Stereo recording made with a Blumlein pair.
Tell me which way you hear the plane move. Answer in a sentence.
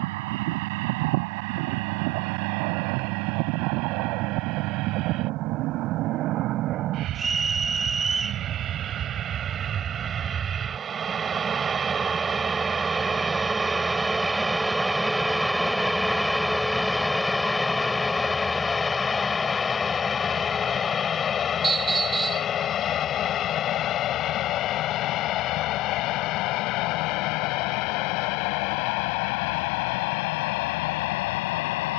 In this clip you hear the plane go from the right side to the left.